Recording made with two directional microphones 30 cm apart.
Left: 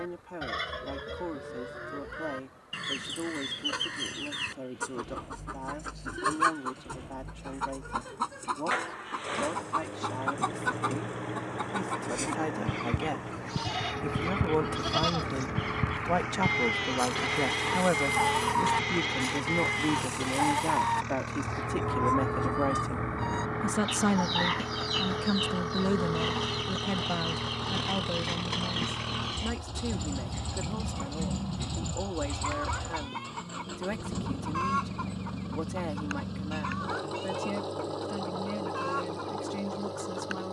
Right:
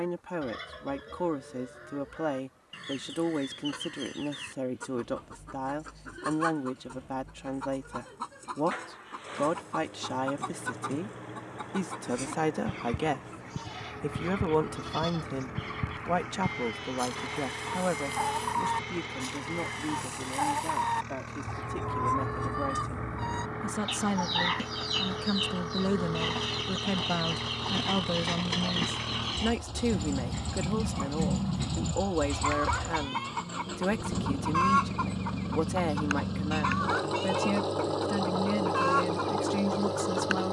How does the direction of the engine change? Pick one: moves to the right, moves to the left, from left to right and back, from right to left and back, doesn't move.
moves to the right.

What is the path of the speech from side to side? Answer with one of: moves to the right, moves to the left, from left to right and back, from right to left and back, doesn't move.
from right to left and back.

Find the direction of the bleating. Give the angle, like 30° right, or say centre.
50° left.